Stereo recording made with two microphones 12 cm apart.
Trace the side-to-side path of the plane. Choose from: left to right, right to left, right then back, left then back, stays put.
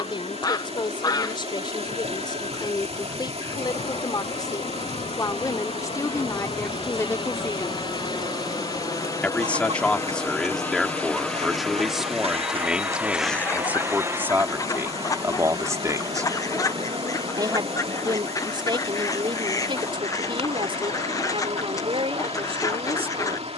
left to right.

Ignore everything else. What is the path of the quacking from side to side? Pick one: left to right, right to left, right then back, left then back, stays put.
right then back.